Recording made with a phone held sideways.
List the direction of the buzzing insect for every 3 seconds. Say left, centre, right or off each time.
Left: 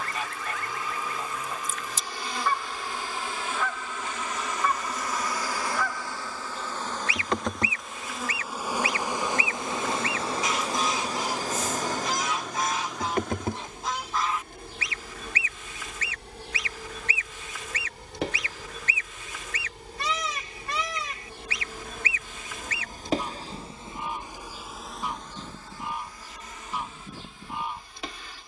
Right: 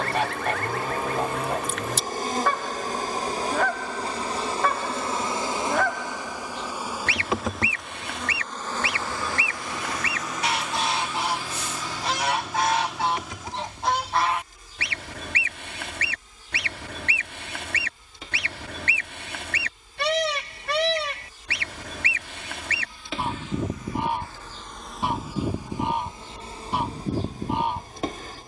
right, right, centre, left, left, left, left, left, centre, right.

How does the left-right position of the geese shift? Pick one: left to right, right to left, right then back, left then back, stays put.
stays put.